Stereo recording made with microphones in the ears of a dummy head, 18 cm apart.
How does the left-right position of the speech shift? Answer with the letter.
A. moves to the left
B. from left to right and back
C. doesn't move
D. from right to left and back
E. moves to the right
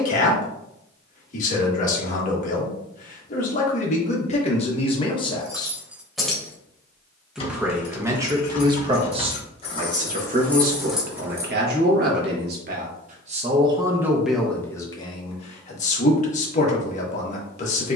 B.